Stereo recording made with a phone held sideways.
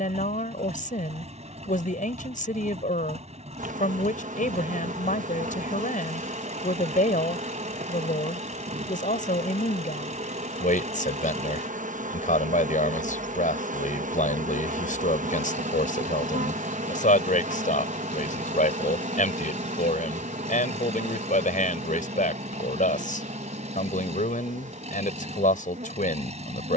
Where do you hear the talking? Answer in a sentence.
You can hear the talking on the left.